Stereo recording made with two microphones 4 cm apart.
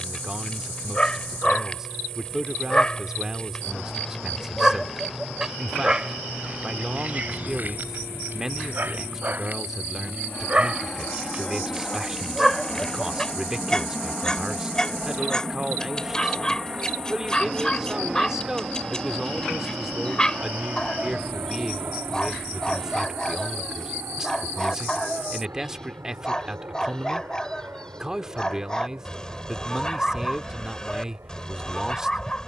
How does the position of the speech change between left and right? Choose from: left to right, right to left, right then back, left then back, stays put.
stays put.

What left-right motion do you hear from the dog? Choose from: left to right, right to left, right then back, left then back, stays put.
right then back.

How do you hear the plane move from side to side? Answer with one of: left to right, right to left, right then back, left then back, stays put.
left to right.